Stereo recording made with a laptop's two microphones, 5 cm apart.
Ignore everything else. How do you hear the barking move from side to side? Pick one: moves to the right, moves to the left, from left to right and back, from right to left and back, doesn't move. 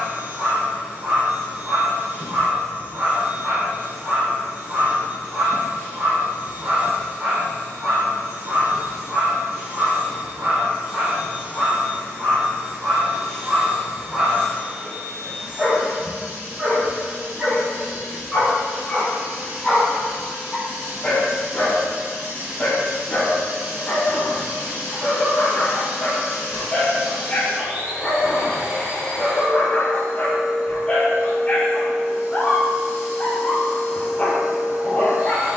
moves to the left.